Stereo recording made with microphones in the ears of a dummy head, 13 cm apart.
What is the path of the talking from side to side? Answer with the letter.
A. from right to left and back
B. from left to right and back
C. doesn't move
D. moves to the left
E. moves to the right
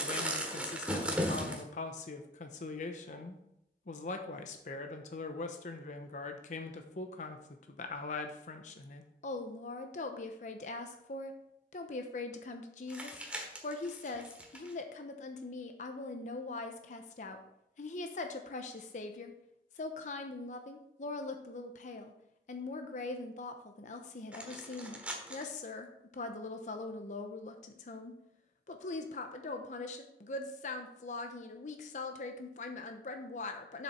C.